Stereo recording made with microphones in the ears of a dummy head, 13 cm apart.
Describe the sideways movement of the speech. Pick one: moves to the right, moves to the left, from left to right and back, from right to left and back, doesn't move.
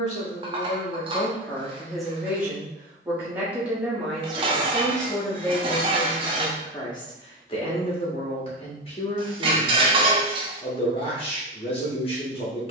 from left to right and back.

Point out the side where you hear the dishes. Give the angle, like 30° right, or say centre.
30° right.